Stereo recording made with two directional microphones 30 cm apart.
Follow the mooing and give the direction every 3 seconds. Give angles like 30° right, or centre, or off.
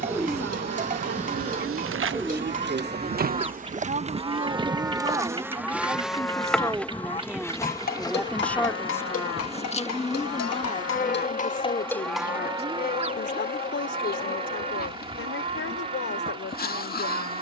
30° right, 10° right, 20° left, 40° left, 20° right, 30° right.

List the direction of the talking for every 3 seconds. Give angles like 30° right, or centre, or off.
40° right, 20° right, centre, 20° left, 40° left, 50° left.